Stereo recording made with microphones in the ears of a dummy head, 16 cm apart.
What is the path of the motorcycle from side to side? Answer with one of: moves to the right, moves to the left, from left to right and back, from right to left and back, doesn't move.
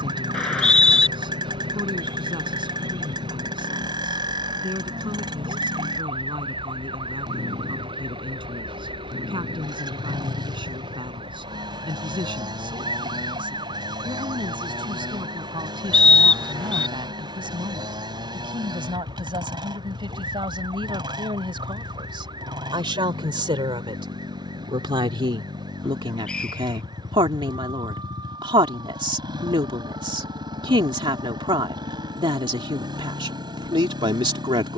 doesn't move.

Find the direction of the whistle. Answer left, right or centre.
centre.